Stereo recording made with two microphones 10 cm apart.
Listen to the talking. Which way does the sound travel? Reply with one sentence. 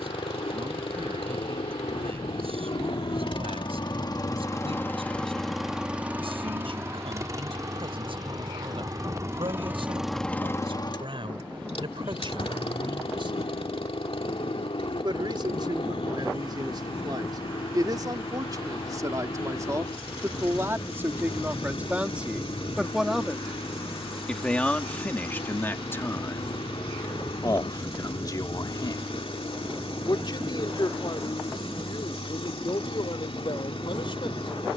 You can hear the talking go from the right side to the left.